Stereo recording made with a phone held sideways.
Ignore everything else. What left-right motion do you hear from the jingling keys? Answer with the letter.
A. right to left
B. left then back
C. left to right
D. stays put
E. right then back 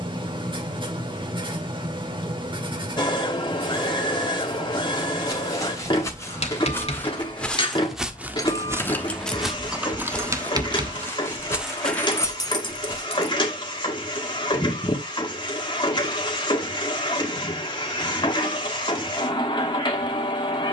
E.